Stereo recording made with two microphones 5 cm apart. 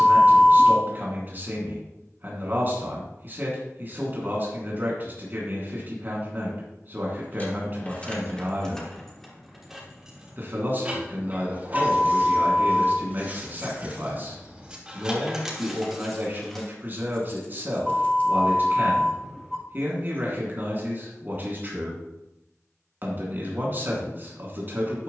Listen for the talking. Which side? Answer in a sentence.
You can hear the talking on the right.